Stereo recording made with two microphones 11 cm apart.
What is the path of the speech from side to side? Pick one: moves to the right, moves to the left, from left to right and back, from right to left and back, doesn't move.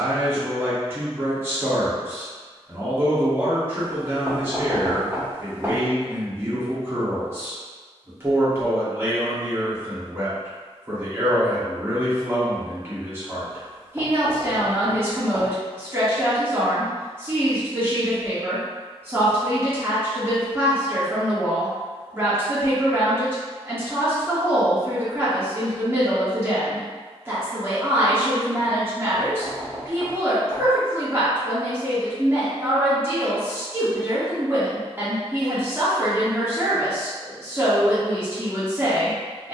doesn't move.